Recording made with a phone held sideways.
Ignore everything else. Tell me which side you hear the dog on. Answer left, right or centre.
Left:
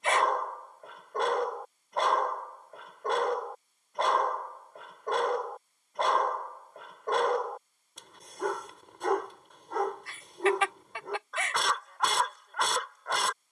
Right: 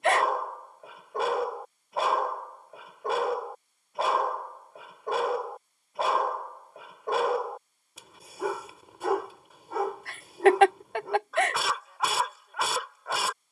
centre.